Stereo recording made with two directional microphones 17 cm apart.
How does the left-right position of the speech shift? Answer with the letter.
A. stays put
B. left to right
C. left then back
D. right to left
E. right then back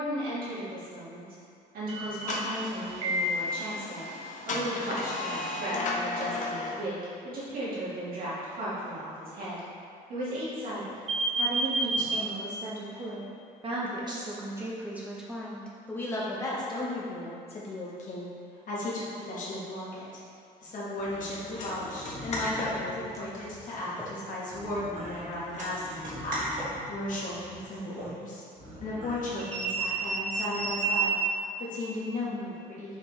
D.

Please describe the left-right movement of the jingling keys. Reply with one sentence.
You can hear the jingling keys move to the right.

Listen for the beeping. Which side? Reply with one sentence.
You can hear the beeping on the right.